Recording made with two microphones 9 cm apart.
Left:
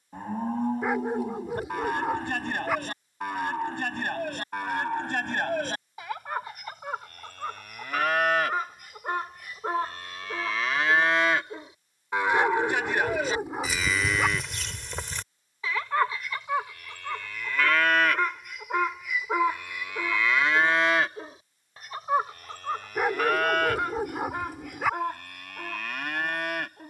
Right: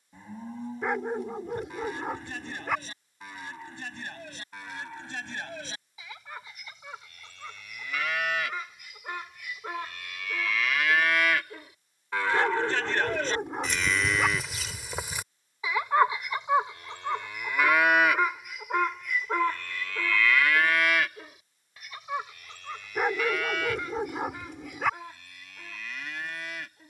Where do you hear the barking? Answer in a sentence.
In this clip you hear the barking in the centre.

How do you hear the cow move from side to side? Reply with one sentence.
In this clip you hear the cow move from left to right and back again.